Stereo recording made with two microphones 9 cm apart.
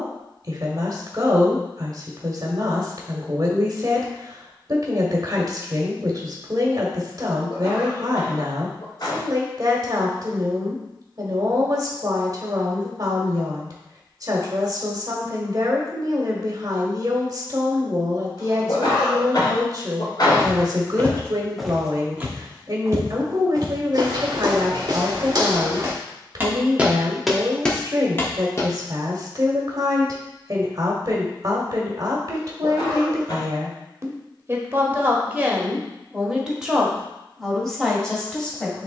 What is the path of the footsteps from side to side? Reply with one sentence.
In this clip you hear the footsteps move from left to right and back again.